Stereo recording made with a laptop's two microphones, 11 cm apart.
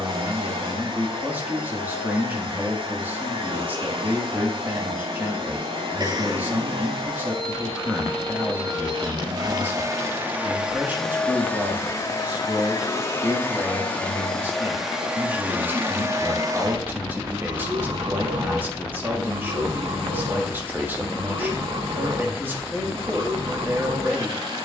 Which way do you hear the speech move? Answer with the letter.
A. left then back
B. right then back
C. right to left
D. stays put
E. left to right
D.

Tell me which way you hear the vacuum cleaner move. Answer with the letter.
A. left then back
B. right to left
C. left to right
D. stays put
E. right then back
A.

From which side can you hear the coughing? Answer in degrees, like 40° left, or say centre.
40° right.